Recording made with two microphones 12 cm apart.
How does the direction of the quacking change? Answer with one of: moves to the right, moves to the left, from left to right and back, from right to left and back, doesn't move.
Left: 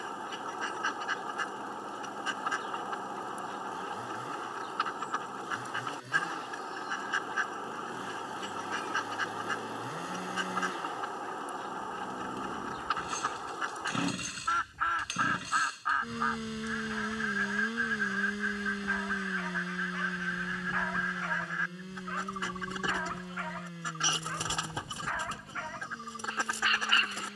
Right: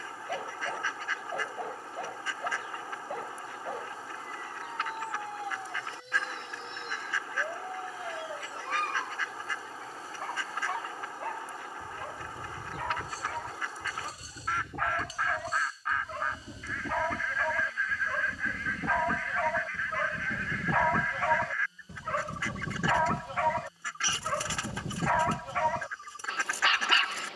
doesn't move.